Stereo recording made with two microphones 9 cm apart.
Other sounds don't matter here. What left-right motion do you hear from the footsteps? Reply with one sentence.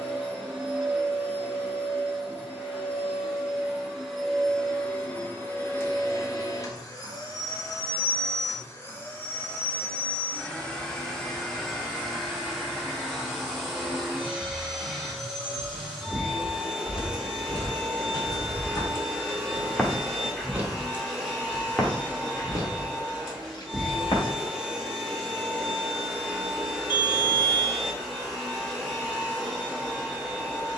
In this clip you hear the footsteps go right and come back.